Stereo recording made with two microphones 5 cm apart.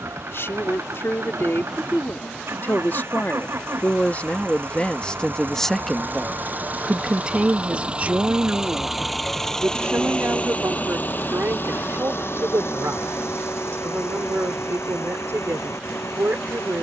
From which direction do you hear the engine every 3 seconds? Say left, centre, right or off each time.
right, right, right, left, left, left.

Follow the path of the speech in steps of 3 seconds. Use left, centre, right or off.
left, left, right, right, right, right.